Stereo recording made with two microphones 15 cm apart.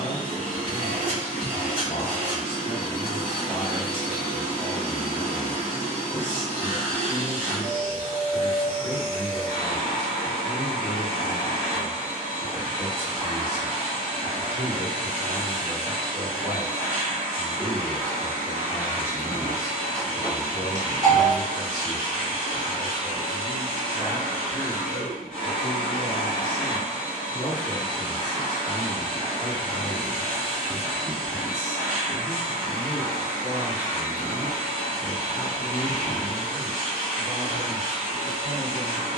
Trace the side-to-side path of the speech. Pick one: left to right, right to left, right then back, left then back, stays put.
right then back.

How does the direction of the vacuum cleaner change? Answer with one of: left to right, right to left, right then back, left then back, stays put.
stays put.